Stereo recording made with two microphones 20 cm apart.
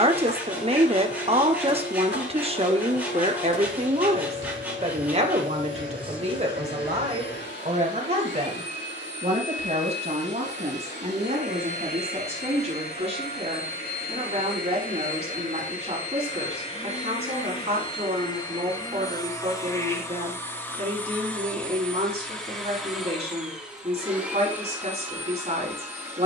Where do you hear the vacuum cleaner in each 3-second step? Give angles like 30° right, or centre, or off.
70° left, 70° left, 70° left, 60° left, 50° left, 30° left, 20° left, centre, 10° right.